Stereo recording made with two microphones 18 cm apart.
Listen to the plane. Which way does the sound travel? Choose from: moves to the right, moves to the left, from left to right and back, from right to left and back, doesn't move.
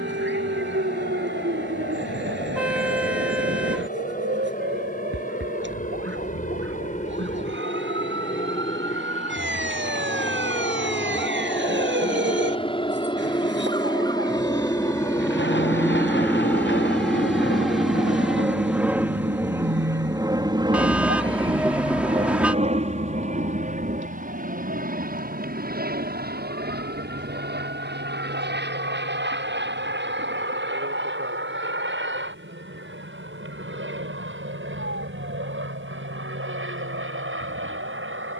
moves to the right.